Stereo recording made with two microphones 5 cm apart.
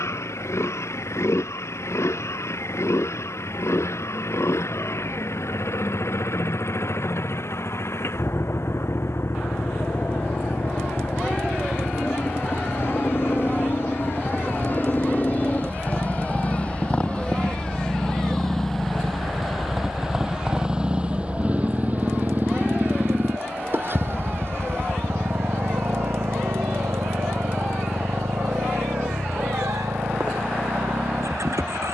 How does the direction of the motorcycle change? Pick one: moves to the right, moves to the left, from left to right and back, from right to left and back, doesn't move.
moves to the right.